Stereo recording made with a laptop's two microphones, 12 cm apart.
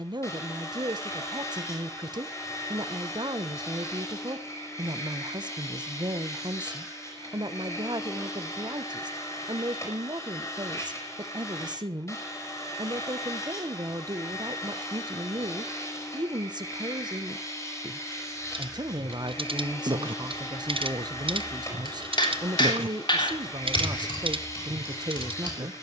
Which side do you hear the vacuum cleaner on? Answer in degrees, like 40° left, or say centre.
20° left.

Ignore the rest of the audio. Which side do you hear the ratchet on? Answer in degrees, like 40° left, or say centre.
50° right.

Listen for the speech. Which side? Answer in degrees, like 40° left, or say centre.
40° right.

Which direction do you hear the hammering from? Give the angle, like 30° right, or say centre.
40° left.